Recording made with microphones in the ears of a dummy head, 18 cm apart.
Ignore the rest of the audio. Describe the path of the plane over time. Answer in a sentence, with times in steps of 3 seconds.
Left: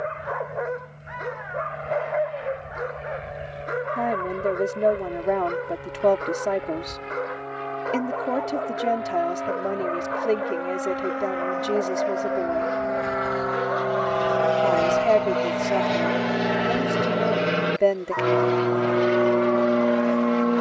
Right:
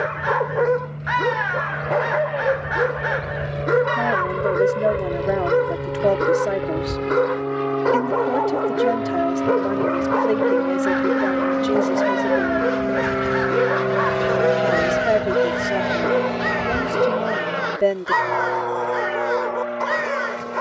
In this clip you hear the plane on the right from 0 s, in the centre from 15 s and on the left from 18 s.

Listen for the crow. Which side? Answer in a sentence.
You can hear the crow on the right.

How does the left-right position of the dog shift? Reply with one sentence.
In this clip you hear the dog stay in one place.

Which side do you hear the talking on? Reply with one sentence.
In this clip you hear the talking in the centre.